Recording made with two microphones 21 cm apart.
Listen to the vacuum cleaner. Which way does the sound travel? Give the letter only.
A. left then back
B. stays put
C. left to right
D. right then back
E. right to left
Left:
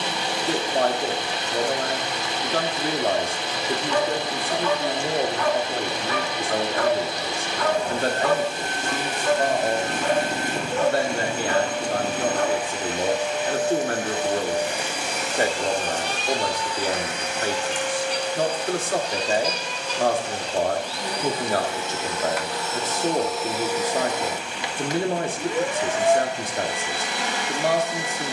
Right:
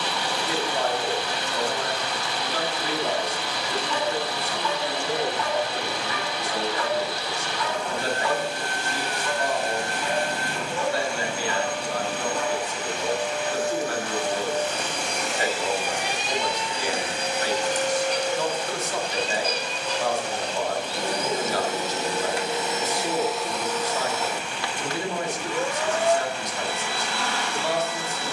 D.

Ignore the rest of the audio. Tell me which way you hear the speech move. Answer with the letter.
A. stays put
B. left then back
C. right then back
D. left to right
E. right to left
A.